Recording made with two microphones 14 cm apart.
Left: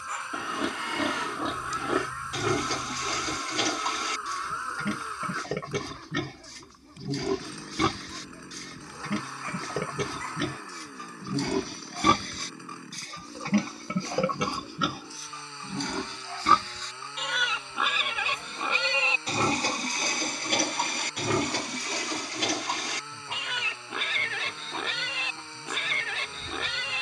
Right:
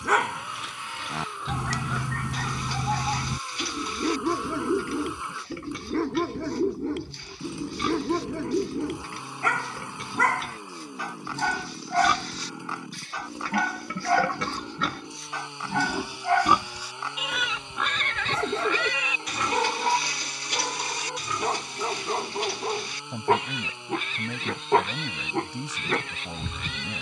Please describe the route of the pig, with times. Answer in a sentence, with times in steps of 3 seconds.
You can hear the pig on the left from 0 s, in the centre from 15 s and on the left from 18 s.